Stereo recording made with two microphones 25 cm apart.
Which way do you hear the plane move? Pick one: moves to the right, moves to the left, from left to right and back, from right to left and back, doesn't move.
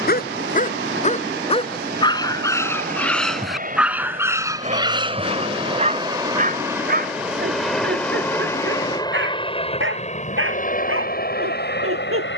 moves to the left.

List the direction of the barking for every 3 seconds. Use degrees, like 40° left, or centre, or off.
20° left, 10° right, 40° right, 60° right.